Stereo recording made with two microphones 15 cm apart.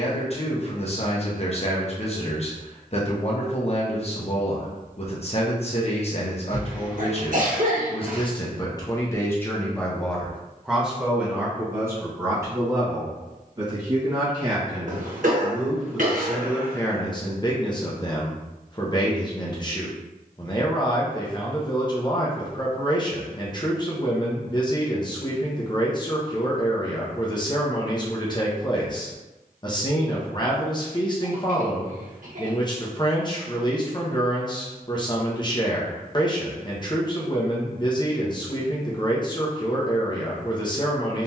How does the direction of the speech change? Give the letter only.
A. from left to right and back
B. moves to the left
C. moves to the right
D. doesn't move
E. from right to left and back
A.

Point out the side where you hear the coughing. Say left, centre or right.
right.